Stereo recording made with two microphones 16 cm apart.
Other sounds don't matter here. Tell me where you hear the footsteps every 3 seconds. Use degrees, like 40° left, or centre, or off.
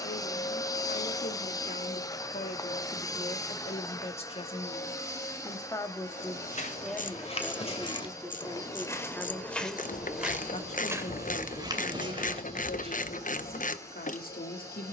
off, off, 40° left, 10° right, 40° right.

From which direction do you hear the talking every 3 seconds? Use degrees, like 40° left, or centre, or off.
60° left, 40° left, centre, 40° left, 70° left.